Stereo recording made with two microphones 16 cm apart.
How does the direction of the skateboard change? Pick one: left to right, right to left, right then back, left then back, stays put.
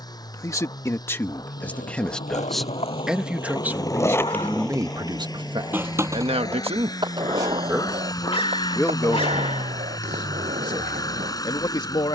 left to right.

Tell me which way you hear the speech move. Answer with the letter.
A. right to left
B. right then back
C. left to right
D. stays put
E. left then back
B.